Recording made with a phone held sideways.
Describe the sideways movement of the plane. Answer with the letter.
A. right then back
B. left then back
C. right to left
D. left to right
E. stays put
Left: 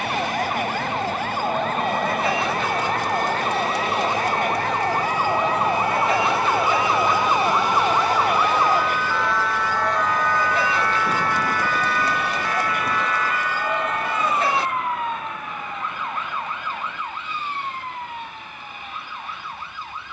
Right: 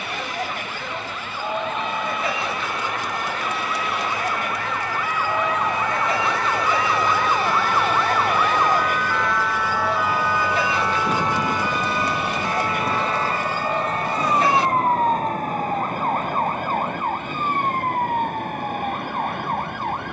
D.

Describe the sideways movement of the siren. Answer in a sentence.
You can hear the siren go from the left side to the right.